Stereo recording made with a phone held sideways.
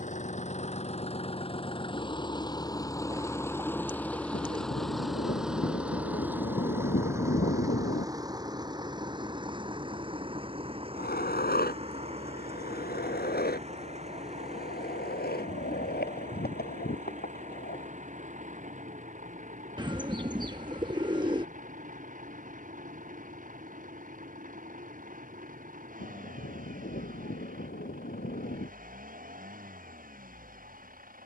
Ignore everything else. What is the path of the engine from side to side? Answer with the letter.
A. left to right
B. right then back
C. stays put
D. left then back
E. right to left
A.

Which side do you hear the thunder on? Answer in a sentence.
You can hear the thunder on the left.